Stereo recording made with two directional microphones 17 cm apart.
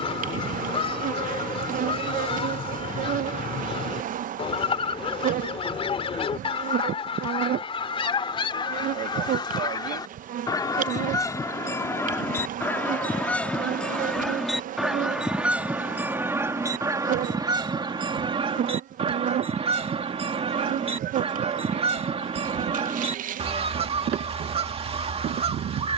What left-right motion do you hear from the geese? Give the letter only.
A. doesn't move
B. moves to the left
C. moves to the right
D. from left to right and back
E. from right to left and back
C.